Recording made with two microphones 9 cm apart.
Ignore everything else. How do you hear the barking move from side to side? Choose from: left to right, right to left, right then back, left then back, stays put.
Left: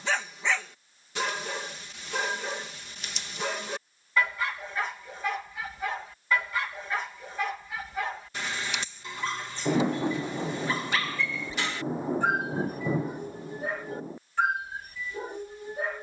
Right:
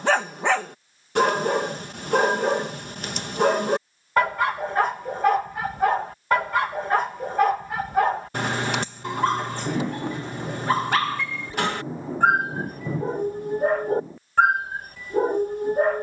stays put.